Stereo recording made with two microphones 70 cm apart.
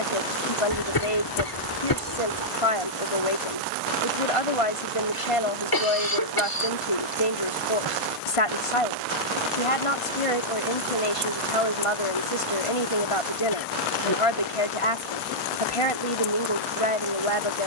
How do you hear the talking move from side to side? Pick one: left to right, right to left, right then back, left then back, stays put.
stays put.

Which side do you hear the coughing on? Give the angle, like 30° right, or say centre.
30° left.